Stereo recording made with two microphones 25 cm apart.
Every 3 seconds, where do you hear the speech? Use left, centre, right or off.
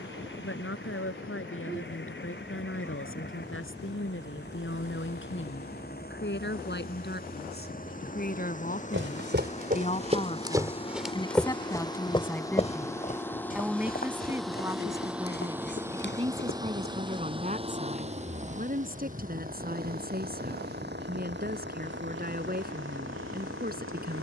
left, left, left, left, centre, right, right, right.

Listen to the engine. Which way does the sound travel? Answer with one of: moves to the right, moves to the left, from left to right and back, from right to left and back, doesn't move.
moves to the right.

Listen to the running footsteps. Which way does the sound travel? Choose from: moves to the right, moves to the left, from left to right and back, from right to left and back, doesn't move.
moves to the left.